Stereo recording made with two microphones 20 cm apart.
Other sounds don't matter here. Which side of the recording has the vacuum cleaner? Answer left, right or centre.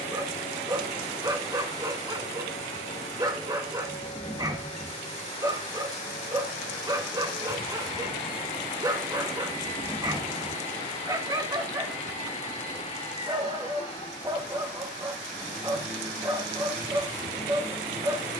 left.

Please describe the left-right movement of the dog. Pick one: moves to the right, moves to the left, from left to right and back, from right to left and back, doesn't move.
doesn't move.